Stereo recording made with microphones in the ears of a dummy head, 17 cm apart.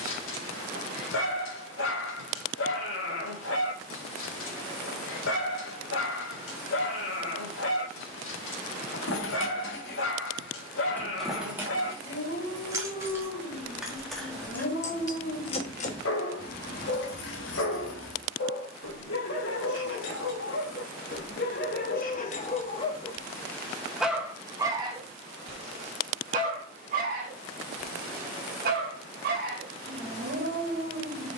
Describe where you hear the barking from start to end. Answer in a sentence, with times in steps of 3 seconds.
You can hear the barking on the left from 0 s and on the right from 24 s.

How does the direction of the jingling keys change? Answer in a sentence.
You can hear the jingling keys go right and come back.